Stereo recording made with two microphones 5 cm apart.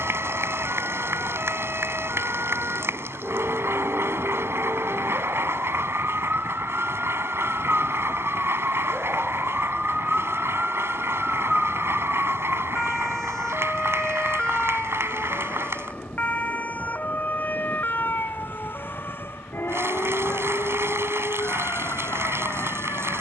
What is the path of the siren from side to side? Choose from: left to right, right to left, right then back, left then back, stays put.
right to left.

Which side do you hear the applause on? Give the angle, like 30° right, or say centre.
50° right.